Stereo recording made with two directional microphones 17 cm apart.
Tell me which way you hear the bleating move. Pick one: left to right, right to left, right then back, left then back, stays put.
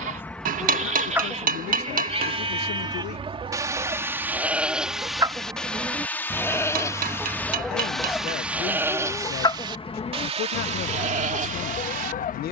left then back.